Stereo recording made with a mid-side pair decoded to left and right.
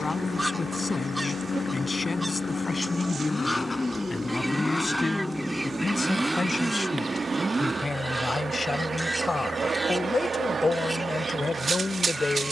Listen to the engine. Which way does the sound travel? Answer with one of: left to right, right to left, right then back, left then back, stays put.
left to right.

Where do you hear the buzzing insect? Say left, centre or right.
right.